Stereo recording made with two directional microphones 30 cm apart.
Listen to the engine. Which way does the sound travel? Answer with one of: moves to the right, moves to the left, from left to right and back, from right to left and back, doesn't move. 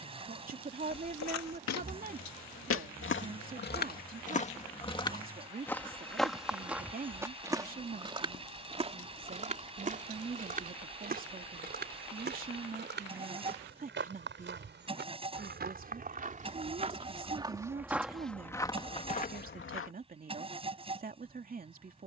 doesn't move.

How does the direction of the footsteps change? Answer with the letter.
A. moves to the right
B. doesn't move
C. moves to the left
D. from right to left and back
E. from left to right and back
E.